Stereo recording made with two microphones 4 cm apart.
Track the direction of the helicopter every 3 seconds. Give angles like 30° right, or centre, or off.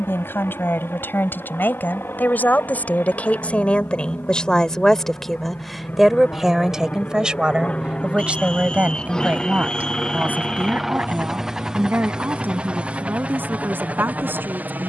60° left, 50° left, 30° left, centre, 30° right.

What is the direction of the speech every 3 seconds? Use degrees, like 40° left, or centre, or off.
50° left, 20° left, 20° right, 40° right, 50° right.